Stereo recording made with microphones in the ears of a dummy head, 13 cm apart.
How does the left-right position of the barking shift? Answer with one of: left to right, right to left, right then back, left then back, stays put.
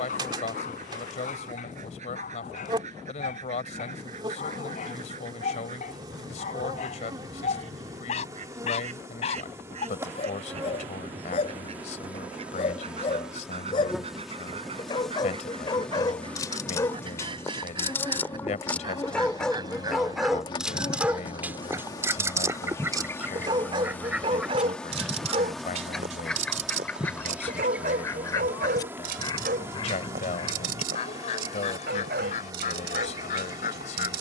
left to right.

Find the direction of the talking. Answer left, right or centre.
left.